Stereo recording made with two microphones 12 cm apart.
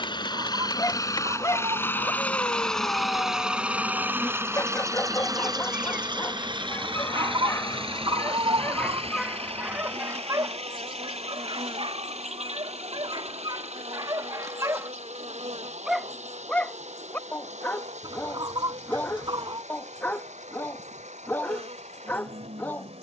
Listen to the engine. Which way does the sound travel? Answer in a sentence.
You can hear the engine move from left to right.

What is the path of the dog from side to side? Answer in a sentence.
In this clip you hear the dog go right and come back.